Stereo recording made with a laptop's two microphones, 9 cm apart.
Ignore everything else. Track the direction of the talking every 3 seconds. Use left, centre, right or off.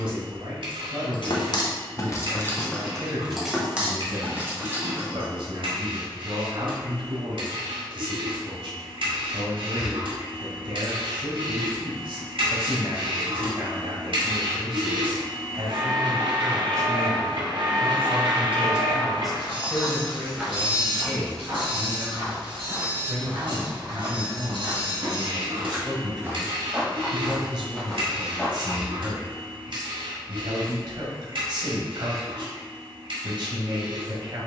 right, right, right, right, right, right, centre, centre, right, right, right, right.